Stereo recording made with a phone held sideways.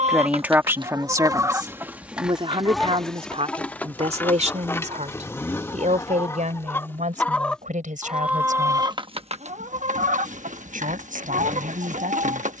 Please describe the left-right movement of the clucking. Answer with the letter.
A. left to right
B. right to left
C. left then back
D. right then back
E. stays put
C.